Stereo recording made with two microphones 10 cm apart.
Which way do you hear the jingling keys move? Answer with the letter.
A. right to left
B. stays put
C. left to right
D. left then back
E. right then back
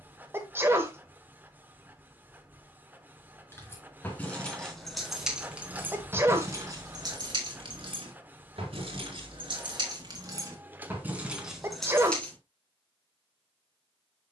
E.